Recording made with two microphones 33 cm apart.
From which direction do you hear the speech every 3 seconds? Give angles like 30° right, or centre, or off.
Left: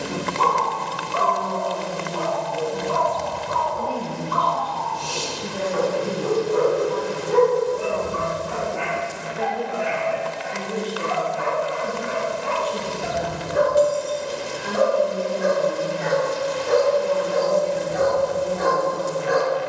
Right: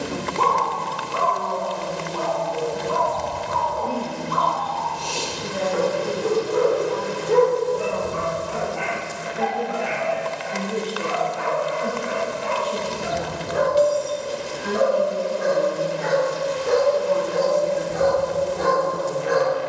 70° left, 50° left, 20° left, 10° right, 30° right, 50° right, 50° right.